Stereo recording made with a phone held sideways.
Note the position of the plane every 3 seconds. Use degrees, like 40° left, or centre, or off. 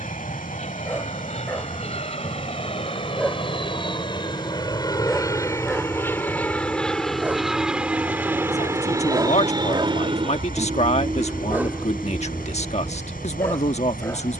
50° left, 30° left, centre, 30° right, 50° right.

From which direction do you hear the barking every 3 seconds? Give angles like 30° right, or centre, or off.
10° left, centre, 10° right, 20° right, 10° left.